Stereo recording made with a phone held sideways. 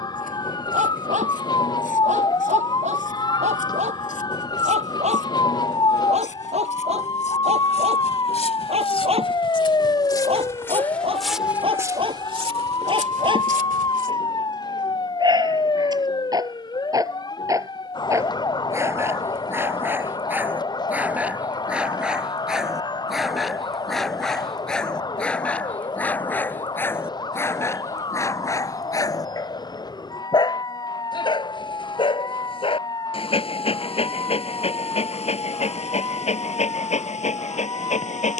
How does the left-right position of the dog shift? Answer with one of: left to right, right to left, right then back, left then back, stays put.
right to left.